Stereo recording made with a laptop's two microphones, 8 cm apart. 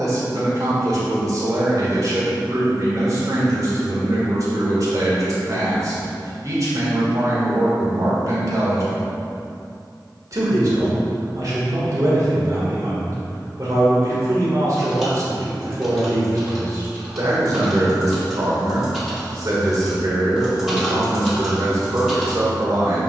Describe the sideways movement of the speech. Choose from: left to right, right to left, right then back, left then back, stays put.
stays put.